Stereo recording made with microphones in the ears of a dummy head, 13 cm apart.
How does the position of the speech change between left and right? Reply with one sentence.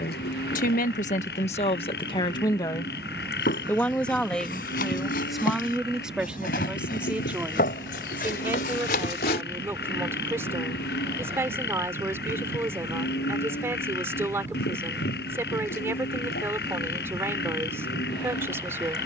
You can hear the speech go from the left side to the right.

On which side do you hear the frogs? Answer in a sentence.
In this clip you hear the frogs on the left.